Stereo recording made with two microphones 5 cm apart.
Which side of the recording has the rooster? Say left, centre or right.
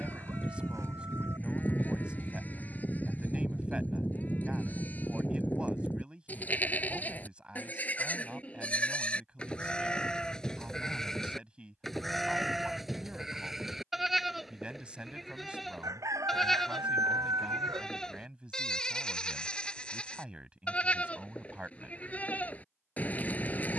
right.